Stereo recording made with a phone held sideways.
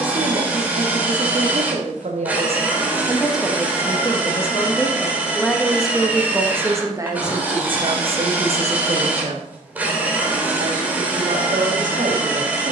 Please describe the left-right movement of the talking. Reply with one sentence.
In this clip you hear the talking go left and come back.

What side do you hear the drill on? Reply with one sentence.
In this clip you hear the drill in the centre.